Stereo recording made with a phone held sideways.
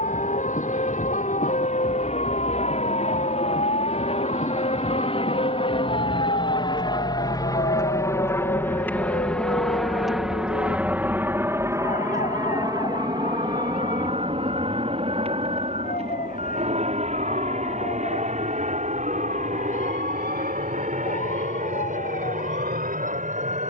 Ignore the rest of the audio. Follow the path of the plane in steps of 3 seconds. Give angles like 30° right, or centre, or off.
60° left, 50° left, 30° left, 10° right, 30° right, 50° right, 60° right, 60° right.